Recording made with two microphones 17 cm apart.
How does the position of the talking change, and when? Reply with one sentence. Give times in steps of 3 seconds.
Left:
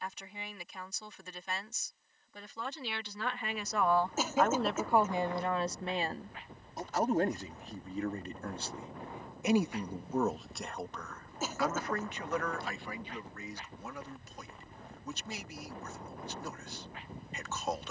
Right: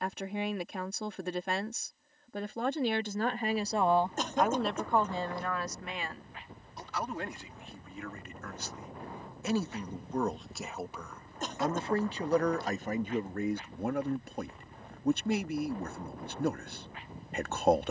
You can hear the talking on the right from 0 s, in the centre from 3 s, on the left from 6 s, in the centre from 9 s and on the right from 12 s.